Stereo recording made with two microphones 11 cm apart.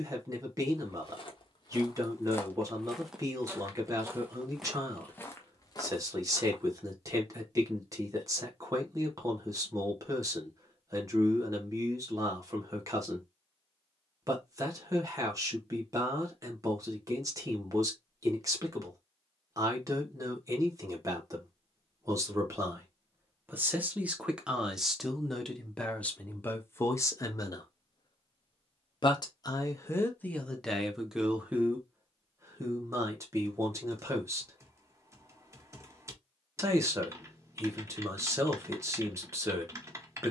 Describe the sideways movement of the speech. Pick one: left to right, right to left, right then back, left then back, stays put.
left then back.